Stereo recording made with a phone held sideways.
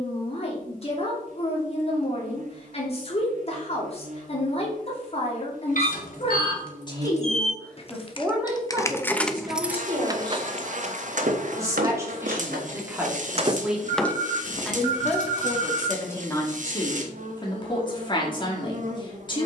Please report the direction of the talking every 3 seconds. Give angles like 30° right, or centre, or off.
40° left, 40° left, 10° left, 30° right, 10° right, 20° left, 30° left.